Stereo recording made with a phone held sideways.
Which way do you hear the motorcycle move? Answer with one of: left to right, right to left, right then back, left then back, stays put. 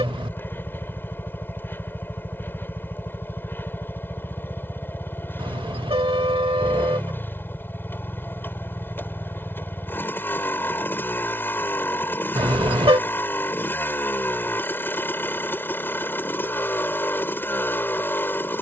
stays put.